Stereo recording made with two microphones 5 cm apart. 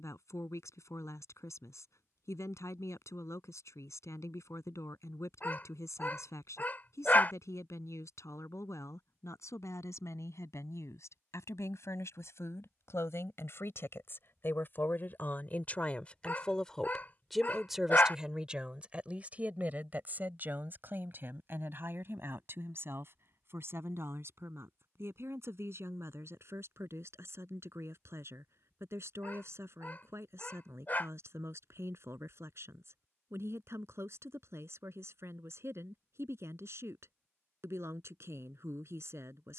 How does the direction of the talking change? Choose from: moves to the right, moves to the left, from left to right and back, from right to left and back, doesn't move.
moves to the right.